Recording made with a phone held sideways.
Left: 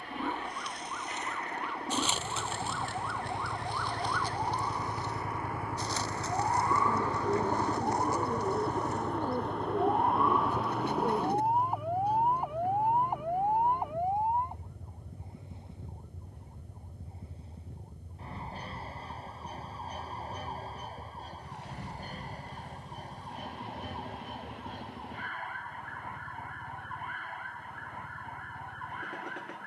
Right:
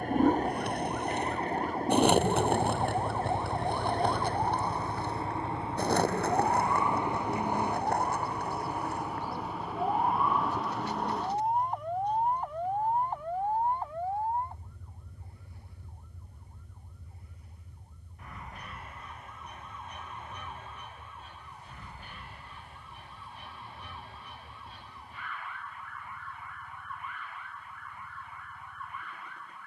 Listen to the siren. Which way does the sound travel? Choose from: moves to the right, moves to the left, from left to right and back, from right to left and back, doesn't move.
moves to the left.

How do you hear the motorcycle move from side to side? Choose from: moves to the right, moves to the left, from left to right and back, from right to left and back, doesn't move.
moves to the left.